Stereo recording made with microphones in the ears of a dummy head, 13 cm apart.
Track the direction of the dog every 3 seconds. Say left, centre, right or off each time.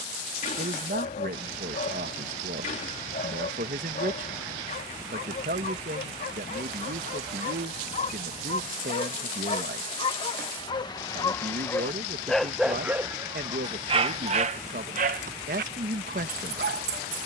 left, left, left, left, right, right.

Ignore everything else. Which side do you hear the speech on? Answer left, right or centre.
right.